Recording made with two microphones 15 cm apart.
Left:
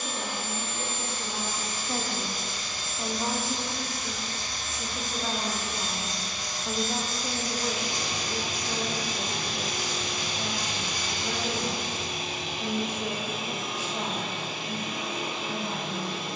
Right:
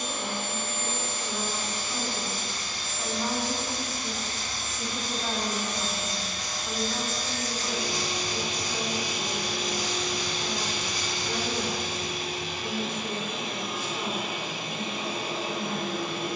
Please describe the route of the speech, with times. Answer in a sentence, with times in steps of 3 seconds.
You can hear the speech on the left from 0 s, in the centre from 3 s and on the left from 6 s.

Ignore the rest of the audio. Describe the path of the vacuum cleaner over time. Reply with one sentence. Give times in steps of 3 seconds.
You can hear the vacuum cleaner on the right from 0 s, in the centre from 9 s and on the right from 15 s.